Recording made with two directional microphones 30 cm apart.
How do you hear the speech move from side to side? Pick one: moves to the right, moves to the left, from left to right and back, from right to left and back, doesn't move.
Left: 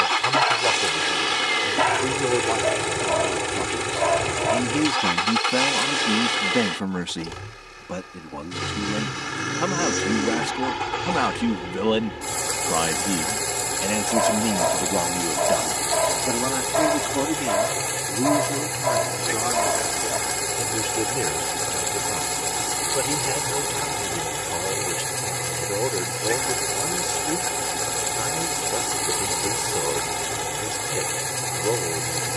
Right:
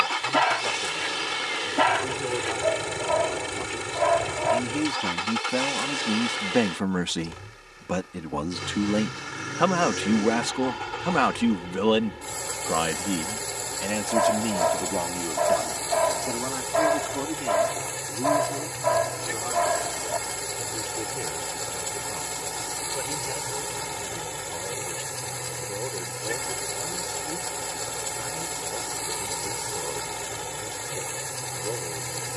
from left to right and back.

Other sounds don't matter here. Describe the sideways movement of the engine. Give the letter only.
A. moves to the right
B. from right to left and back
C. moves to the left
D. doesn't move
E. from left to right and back
D.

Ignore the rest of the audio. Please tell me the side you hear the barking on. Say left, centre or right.
centre.